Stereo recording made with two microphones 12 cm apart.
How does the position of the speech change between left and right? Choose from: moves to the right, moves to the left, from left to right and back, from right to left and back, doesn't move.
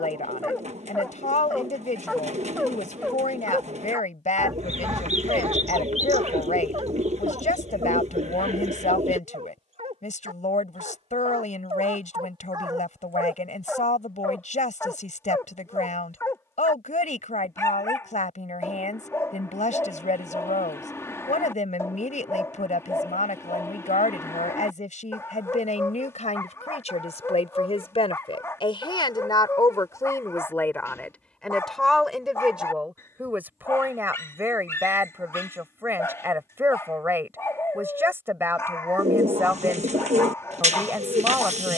moves to the right.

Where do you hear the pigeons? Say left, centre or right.
right.